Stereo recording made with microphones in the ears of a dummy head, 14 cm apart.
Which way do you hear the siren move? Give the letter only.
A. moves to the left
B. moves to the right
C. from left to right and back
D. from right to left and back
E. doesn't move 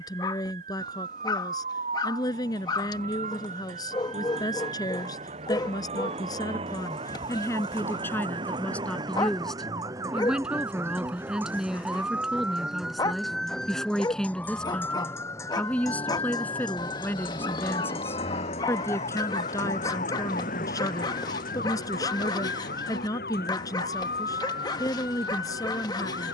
A.